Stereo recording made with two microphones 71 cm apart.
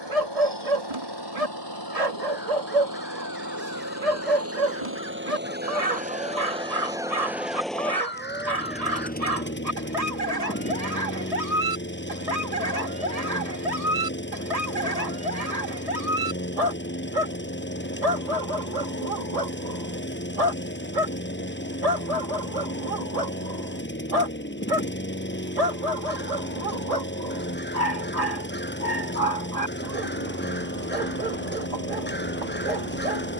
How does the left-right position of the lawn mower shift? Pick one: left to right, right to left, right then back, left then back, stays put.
right to left.